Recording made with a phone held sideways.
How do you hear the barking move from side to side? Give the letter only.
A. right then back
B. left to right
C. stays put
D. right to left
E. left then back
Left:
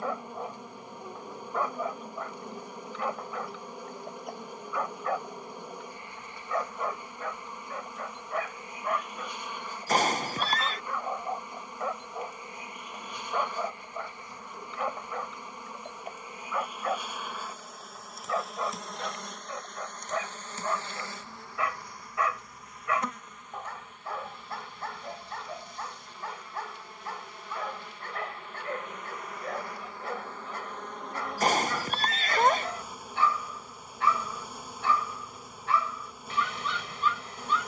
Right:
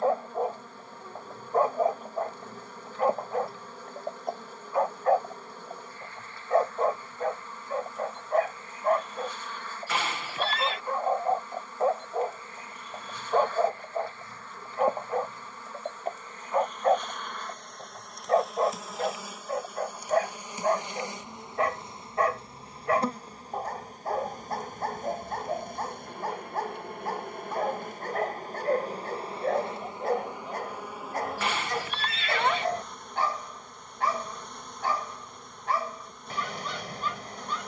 C.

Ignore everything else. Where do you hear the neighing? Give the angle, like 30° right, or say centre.
40° left.